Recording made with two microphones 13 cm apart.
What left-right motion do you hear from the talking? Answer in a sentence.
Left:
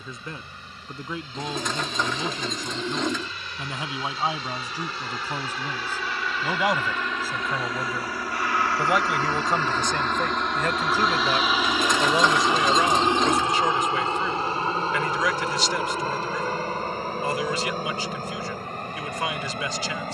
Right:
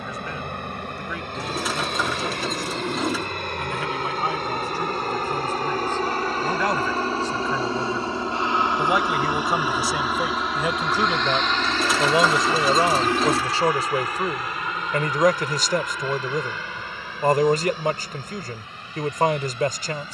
In this clip you hear the talking travel towards the right.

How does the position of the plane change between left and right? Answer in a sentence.
In this clip you hear the plane go from the right side to the left.